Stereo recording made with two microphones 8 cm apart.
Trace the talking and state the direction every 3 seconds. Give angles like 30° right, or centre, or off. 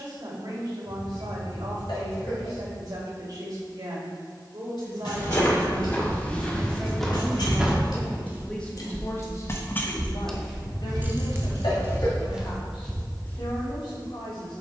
50° right, 50° right, 10° right, 60° left, 80° left.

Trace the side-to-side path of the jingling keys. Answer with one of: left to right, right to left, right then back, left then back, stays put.
left to right.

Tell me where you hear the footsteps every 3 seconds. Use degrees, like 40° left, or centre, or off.
off, 20° left, centre, 50° right, 10° left.